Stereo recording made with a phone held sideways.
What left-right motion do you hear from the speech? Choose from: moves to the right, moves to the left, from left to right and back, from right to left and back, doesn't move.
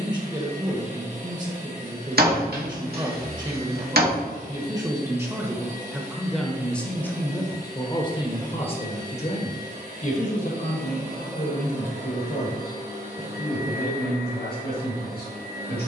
moves to the left.